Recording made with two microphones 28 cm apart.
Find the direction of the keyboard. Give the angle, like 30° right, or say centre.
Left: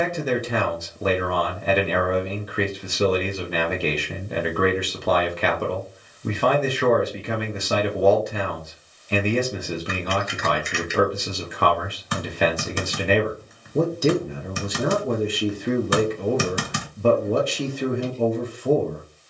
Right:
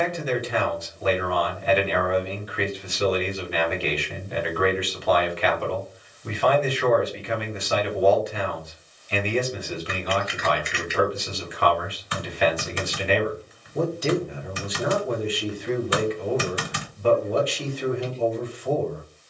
50° left.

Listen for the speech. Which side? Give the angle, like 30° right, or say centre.
50° left.